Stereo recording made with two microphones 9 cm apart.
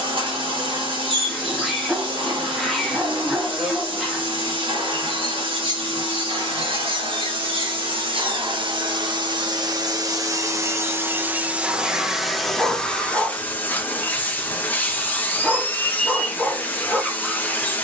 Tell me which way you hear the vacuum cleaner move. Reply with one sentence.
In this clip you hear the vacuum cleaner move to the left.